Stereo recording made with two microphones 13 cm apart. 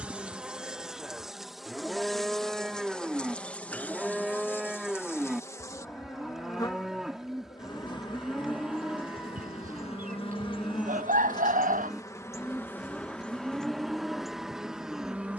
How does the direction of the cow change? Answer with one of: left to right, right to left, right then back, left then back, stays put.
stays put.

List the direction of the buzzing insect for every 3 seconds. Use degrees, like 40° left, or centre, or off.
centre, 10° left, 30° left, 40° left, 10° left.